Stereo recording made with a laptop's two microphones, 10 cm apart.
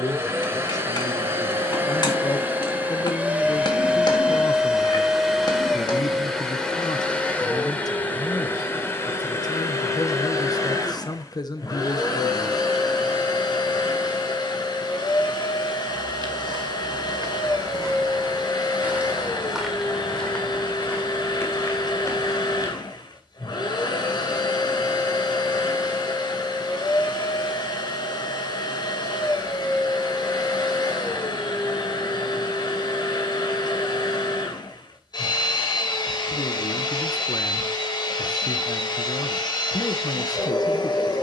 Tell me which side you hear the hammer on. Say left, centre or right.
left.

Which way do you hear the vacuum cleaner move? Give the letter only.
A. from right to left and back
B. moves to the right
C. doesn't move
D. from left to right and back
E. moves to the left
E.